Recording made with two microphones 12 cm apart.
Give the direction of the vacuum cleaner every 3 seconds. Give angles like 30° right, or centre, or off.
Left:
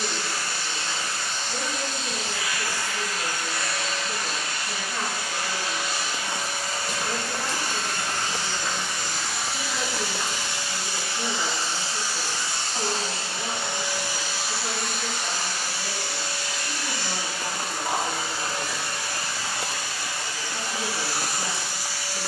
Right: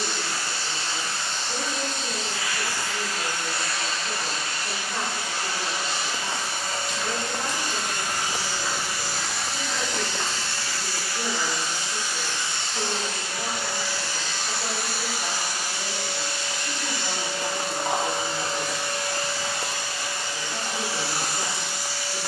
30° right, 30° right, 20° right, 10° left, 20° left, 20° right, 20° right, 20° right.